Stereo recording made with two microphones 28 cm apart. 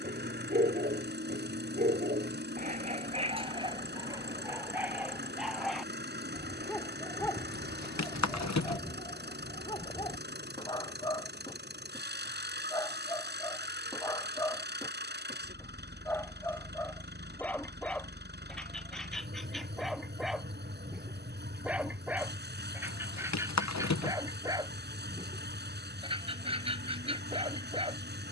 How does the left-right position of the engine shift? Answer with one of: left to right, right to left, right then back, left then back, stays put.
stays put.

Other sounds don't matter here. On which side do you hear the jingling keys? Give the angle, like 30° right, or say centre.
70° left.